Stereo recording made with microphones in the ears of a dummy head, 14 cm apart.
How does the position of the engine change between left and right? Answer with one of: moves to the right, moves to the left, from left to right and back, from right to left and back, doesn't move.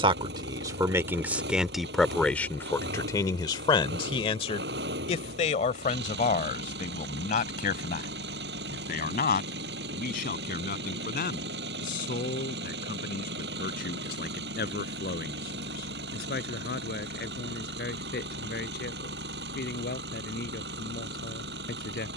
doesn't move.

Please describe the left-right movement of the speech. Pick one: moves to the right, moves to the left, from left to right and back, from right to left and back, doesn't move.
moves to the left.